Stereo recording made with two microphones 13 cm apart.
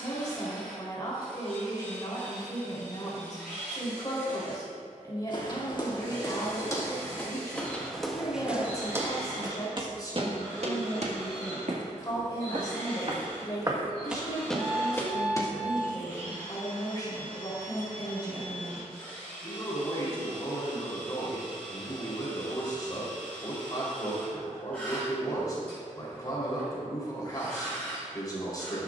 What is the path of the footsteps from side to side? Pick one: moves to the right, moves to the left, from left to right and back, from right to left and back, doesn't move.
from left to right and back.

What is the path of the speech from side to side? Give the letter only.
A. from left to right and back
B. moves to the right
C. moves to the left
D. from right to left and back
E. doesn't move
E.